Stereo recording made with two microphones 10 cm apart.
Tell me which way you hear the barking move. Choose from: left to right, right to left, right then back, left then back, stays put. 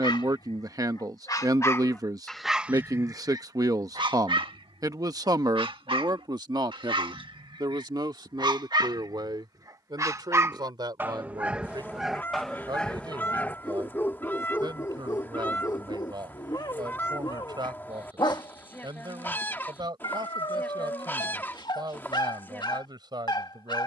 right then back.